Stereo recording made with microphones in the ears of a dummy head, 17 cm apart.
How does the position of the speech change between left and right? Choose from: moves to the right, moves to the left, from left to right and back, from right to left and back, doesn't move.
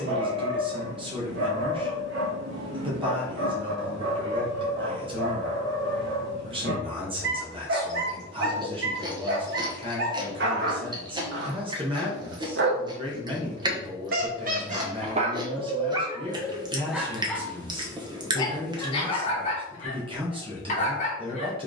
doesn't move.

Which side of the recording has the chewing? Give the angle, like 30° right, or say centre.
20° right.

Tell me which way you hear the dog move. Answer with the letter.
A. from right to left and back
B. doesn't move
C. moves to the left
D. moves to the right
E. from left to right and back
C.